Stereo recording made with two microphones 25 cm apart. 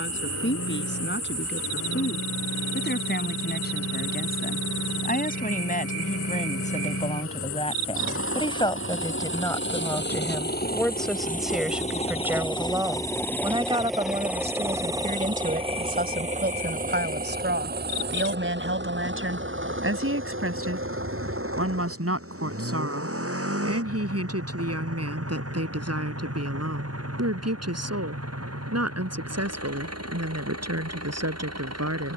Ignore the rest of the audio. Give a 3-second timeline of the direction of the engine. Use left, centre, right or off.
left, left, left, left, centre, right, right, right, right, right, right.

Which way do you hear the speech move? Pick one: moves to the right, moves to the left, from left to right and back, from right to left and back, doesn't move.
moves to the right.